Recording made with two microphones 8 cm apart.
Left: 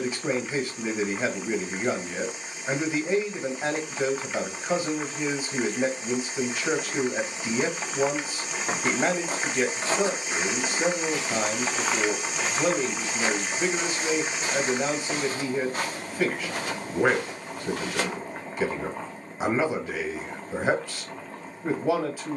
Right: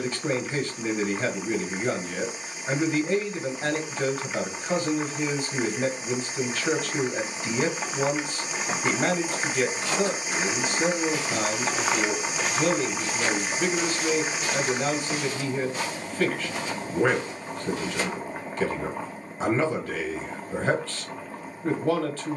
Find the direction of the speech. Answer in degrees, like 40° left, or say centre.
10° left.